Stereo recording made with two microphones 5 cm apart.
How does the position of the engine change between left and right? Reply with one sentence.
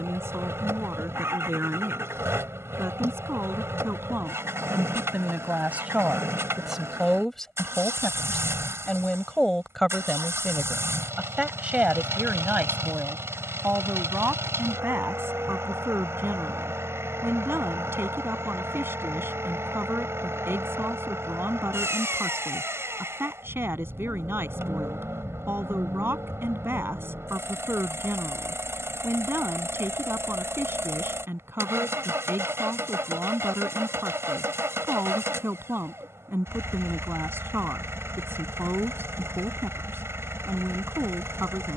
In this clip you hear the engine stay put.